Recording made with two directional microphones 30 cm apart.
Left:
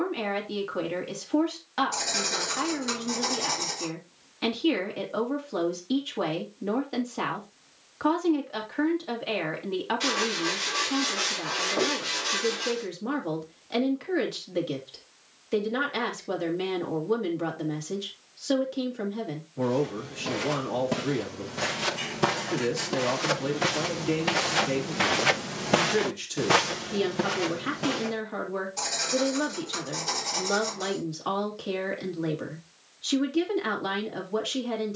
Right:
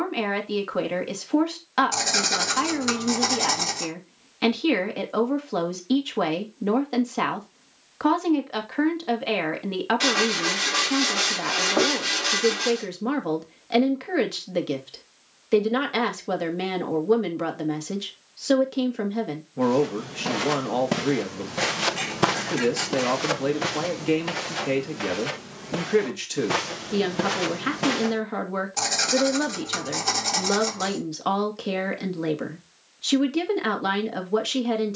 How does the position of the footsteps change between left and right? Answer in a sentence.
In this clip you hear the footsteps move from right to left and back again.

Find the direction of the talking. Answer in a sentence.
You can hear the talking on the right.